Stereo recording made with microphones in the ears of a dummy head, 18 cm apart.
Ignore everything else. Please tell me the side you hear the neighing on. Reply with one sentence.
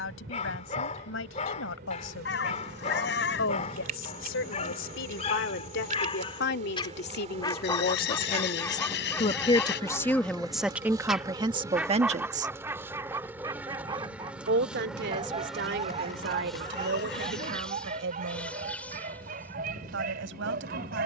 In this clip you hear the neighing on the left.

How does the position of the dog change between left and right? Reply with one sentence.
You can hear the dog travel towards the right.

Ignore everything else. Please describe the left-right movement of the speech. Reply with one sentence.
In this clip you hear the speech go from the left side to the right.